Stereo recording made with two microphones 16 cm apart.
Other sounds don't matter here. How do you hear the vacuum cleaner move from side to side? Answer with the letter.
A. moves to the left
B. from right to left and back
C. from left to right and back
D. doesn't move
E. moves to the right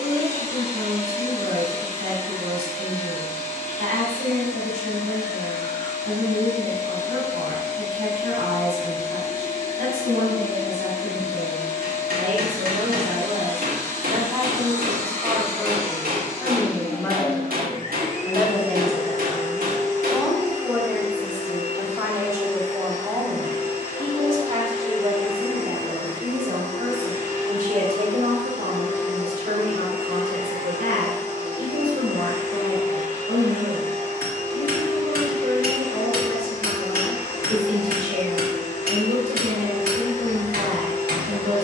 D.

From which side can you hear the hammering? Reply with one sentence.
In this clip you hear the hammering on the right.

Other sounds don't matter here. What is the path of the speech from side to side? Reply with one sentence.
You can hear the speech go left and come back.